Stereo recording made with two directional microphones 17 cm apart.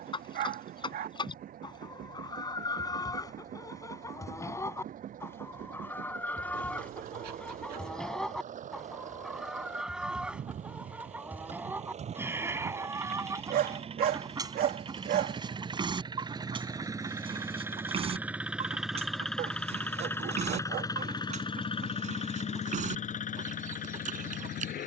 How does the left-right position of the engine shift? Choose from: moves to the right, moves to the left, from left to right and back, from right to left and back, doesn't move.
moves to the left.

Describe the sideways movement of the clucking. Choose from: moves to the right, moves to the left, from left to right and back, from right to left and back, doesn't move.
moves to the right.